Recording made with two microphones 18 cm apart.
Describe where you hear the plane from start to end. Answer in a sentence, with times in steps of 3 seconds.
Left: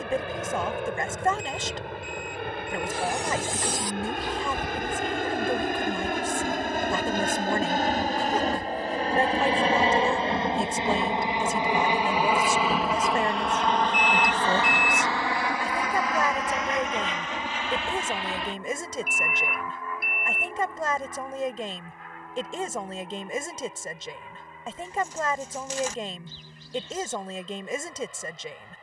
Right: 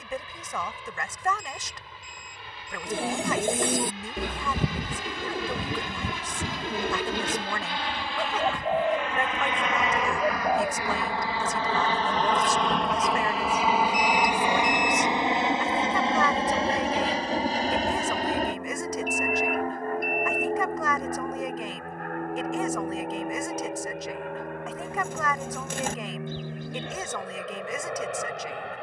In this clip you hear the plane on the left from 0 s, in the centre from 12 s and on the right from 15 s.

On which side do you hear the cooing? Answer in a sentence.
You can hear the cooing on the right.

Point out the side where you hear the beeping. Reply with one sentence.
You can hear the beeping in the centre.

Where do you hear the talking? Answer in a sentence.
You can hear the talking on the left.